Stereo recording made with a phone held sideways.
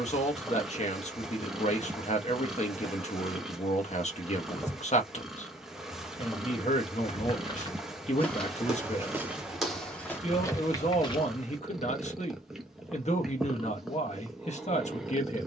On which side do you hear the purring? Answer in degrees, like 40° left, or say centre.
centre.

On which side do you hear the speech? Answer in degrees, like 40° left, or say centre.
50° left.